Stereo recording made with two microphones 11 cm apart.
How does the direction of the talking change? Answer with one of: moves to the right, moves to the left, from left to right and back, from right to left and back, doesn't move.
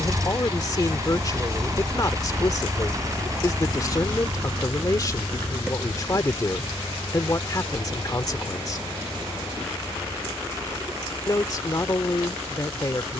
doesn't move.